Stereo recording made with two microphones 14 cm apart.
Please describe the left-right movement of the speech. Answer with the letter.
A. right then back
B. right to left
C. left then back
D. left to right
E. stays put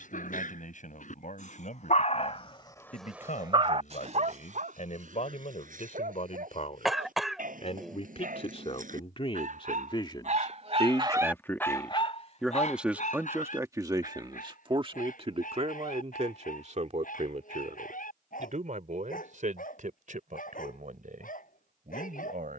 D.